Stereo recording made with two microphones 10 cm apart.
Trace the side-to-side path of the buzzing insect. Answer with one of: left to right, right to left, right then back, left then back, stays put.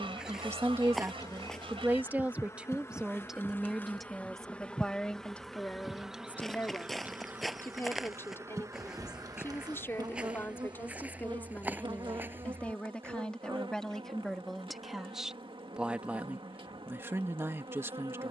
left to right.